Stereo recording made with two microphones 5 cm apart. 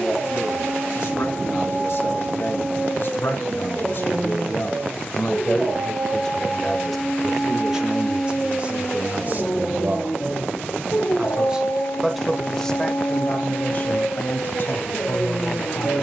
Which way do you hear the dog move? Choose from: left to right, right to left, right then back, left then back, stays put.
right to left.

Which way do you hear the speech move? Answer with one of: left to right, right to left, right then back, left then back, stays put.
right then back.